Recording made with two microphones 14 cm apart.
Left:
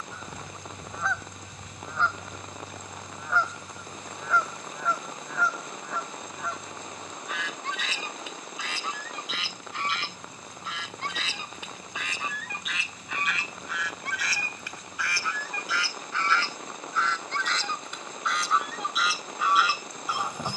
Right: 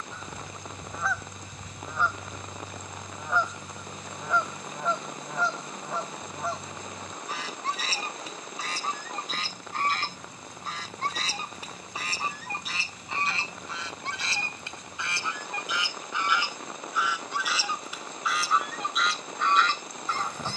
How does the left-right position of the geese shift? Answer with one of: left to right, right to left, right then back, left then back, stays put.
right then back.